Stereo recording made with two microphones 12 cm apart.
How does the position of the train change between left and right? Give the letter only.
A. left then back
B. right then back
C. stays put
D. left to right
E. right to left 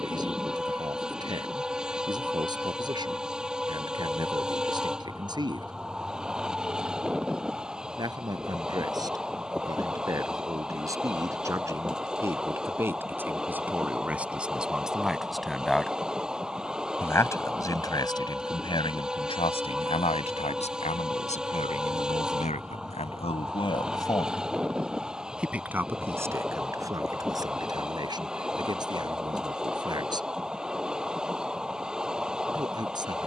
C.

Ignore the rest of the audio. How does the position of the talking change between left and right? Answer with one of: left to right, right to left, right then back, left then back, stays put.
left then back.